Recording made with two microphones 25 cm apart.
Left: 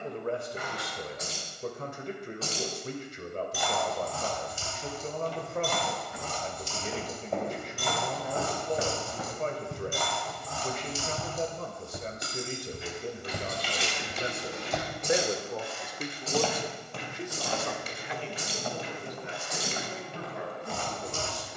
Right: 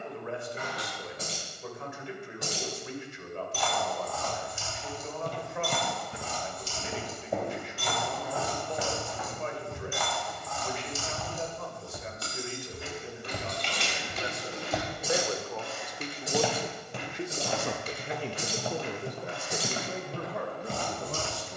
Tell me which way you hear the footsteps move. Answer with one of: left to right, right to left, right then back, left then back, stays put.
left then back.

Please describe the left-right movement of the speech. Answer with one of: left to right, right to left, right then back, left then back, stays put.
left to right.